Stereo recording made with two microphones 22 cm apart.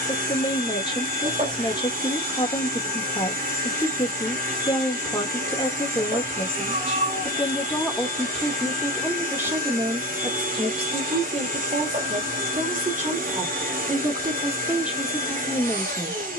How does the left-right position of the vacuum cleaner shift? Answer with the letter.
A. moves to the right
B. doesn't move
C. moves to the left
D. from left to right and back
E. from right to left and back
B.